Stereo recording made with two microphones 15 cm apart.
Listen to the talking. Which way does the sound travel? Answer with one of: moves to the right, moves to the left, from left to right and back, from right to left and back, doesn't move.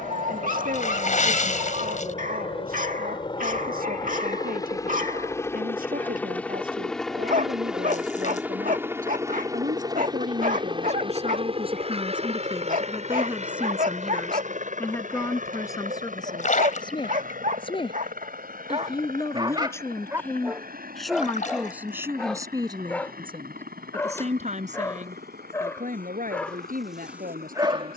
from right to left and back.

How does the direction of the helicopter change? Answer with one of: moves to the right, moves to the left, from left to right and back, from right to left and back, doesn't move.
moves to the right.